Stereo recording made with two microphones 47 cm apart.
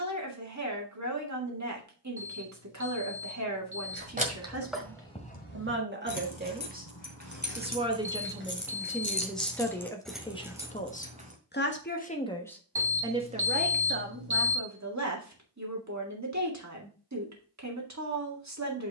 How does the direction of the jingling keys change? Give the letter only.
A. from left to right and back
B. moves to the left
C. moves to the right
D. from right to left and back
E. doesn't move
D.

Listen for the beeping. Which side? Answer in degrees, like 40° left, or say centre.
50° right.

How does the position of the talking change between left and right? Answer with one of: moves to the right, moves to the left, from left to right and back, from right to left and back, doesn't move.
from right to left and back.